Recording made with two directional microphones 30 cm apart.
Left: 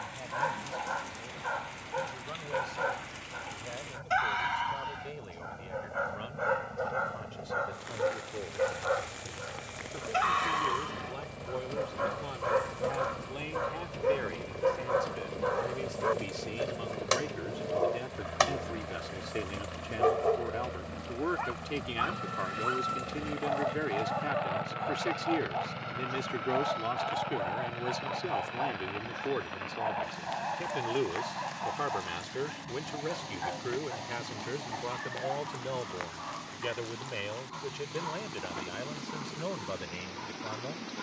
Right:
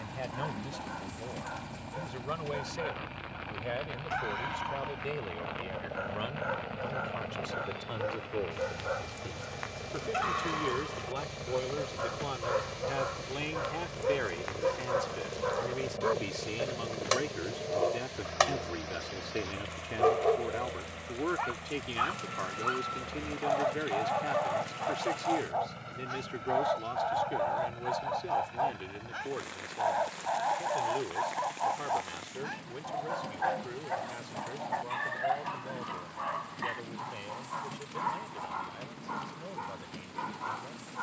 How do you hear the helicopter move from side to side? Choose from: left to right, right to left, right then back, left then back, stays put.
right to left.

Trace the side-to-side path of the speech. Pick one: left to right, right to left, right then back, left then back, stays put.
right to left.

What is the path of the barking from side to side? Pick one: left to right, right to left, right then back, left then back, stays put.
left to right.